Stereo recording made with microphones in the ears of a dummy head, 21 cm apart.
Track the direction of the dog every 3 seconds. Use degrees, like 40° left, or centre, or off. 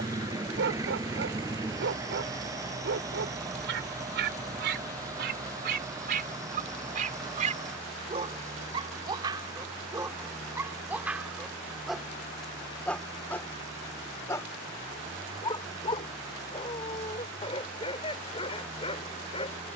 50° right, 50° right, 30° right, 10° right, 10° left, 20° left, 20° left.